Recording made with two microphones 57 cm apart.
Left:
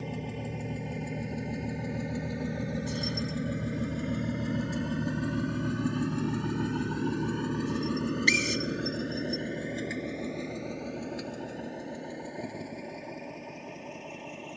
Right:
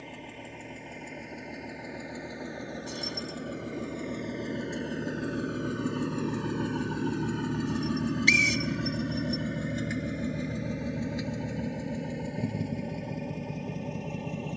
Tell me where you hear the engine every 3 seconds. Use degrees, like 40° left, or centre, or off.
60° left, 30° left, 10° right, 40° right, 50° right.